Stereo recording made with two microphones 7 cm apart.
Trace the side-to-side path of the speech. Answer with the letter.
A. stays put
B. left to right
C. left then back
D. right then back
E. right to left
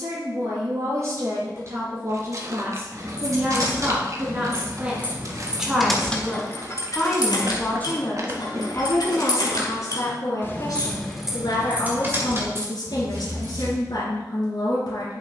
E.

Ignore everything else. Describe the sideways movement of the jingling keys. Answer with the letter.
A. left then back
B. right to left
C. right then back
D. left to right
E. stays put
A.